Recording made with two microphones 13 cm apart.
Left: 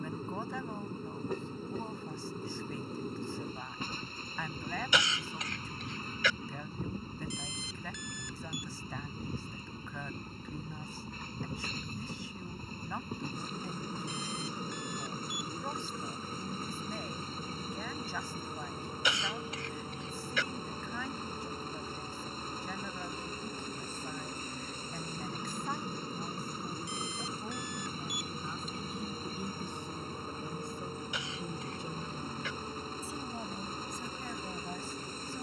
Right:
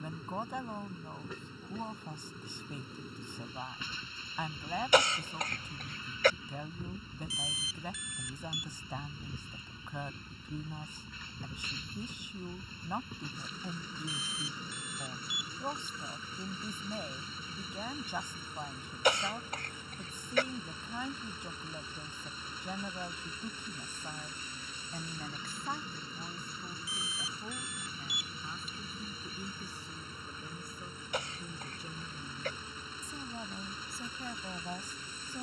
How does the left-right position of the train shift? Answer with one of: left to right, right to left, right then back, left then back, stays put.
stays put.